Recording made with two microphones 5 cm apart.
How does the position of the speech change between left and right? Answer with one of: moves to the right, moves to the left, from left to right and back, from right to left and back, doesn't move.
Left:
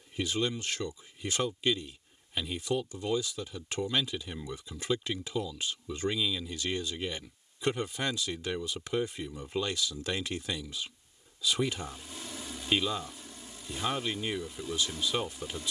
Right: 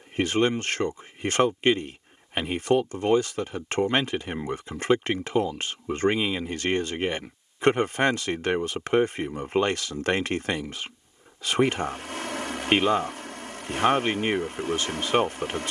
doesn't move.